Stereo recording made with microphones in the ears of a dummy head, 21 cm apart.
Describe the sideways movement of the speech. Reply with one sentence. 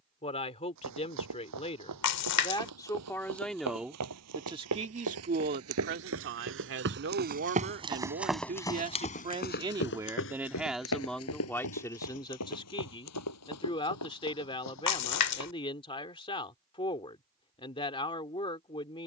In this clip you hear the speech move from left to right and back again.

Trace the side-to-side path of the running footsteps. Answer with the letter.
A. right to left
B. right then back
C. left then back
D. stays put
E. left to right
A.